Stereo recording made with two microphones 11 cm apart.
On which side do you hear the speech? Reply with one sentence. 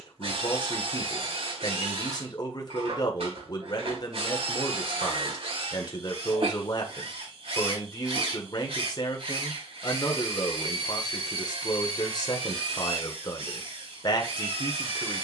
In this clip you hear the speech on the left.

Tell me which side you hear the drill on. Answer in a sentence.
In this clip you hear the drill on the right.